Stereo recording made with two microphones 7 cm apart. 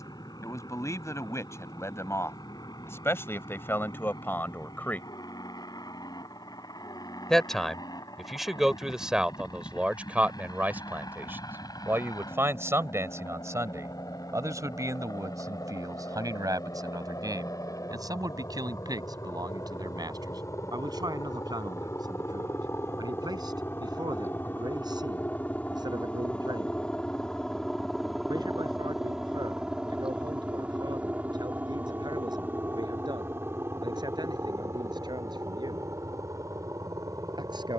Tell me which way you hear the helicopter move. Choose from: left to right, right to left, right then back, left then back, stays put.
left to right.